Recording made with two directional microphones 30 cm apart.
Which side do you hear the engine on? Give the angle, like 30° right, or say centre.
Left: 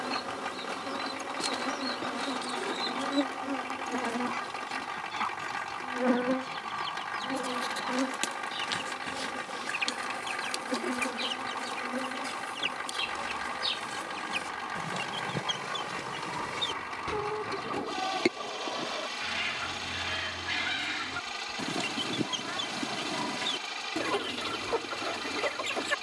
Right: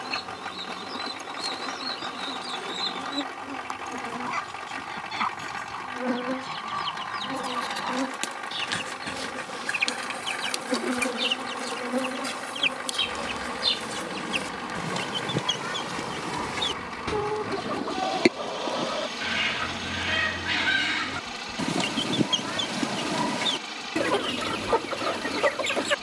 10° right.